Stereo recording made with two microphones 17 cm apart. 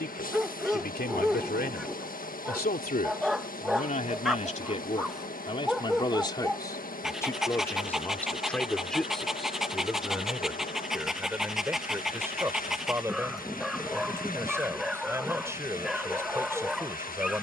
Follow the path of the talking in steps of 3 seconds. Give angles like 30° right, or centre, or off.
60° left, 40° left, 10° left, 10° right, 10° right, 10° right.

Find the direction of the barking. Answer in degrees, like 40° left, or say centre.
centre.